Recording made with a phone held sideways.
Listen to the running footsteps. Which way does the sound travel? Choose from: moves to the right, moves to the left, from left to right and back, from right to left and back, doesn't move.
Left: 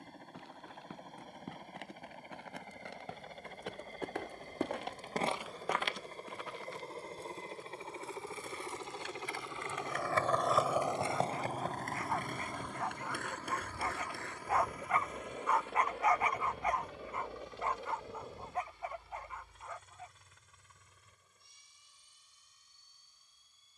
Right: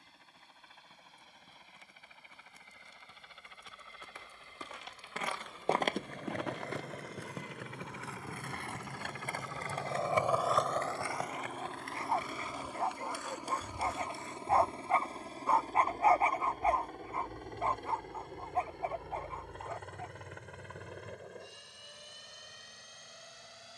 moves to the right.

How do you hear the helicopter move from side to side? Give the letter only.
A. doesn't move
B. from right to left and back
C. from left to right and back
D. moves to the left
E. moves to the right
E.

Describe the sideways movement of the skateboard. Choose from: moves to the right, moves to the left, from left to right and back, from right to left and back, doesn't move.
moves to the left.